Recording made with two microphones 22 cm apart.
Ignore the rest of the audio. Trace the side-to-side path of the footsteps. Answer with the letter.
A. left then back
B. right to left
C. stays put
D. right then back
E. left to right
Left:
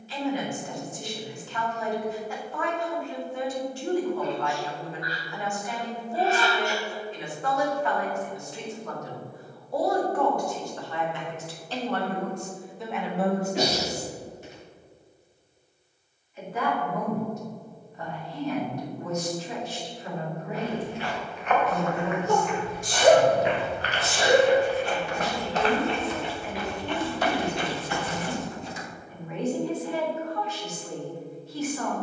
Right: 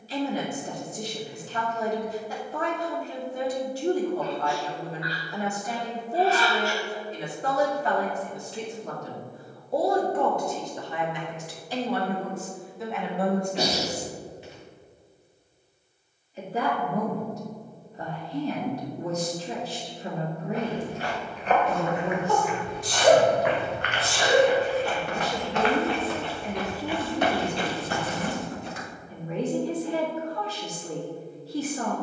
A.